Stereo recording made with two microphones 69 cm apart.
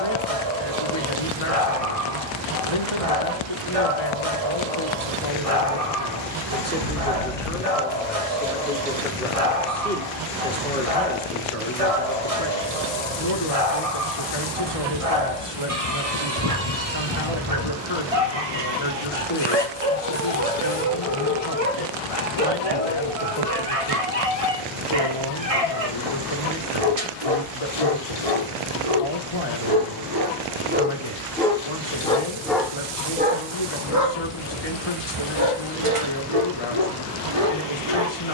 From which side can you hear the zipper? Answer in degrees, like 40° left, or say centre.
40° left.